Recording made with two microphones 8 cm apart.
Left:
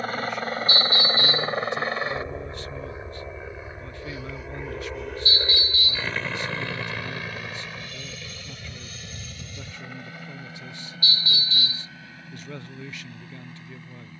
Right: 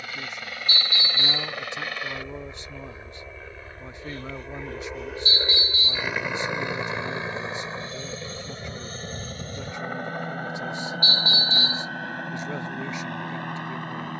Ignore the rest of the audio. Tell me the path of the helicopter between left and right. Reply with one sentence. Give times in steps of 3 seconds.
You can hear the helicopter on the left from 0 s, in the centre from 3 s and on the right from 6 s.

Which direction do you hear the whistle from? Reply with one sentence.
In this clip you hear the whistle on the right.